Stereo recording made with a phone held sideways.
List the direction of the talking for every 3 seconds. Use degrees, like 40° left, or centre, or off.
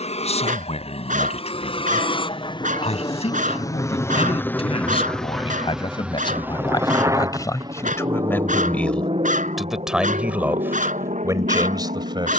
50° left, 50° left, 20° left, 10° right.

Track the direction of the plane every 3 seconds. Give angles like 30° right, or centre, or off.
40° left, 10° left, 30° right, 50° right.